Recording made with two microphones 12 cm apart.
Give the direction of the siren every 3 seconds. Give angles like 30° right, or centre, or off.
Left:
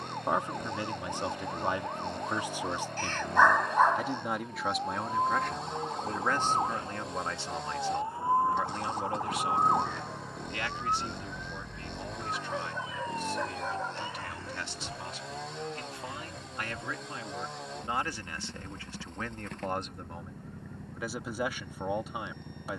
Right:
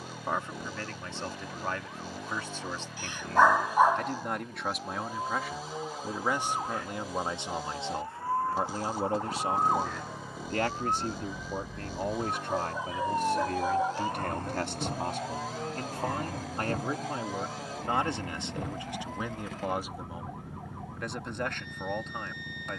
50° left, 40° left, 30° left, centre, 40° right, 60° right, 70° right, 80° right.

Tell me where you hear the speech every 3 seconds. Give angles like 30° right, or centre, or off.
20° left, centre, 20° right, 40° right, 50° right, 40° right, 10° right, 10° left.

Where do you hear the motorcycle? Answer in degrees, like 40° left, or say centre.
centre.